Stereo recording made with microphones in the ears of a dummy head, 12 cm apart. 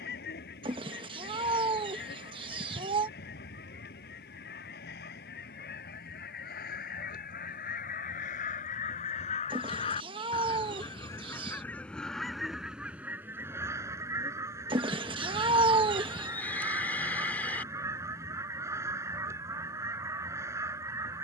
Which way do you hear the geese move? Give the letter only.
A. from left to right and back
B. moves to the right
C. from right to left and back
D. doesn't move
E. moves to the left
B.